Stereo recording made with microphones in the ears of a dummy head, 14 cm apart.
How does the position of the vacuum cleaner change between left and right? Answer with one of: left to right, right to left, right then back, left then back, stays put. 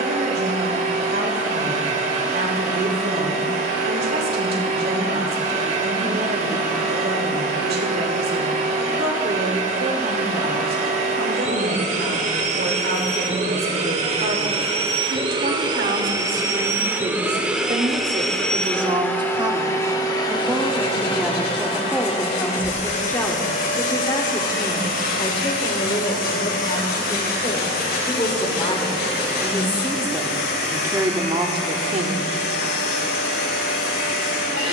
right to left.